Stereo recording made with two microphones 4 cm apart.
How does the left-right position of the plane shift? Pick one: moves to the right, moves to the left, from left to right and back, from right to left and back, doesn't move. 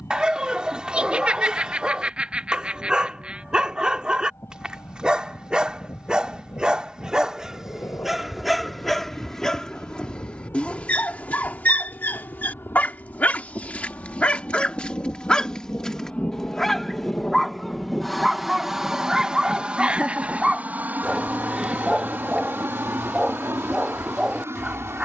moves to the right.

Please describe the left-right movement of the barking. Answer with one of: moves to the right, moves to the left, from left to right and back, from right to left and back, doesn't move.
from right to left and back.